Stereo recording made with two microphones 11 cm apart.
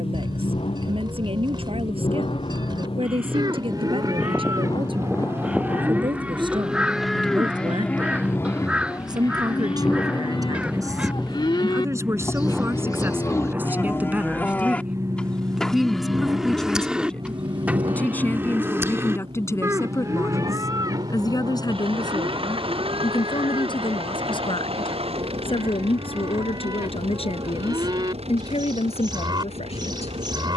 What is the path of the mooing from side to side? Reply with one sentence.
In this clip you hear the mooing move from right to left and back again.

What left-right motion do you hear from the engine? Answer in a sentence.
In this clip you hear the engine move to the right.